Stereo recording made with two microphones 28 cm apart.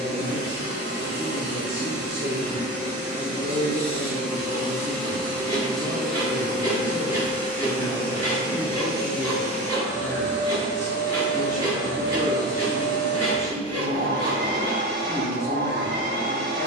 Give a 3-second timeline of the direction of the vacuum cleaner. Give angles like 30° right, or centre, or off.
40° right, 10° right, 10° right, 30° right, 40° right, 40° right.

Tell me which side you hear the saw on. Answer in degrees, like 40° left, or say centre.
10° left.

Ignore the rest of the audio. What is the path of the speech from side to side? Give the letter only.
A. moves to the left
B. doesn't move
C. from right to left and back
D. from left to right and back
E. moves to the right
B.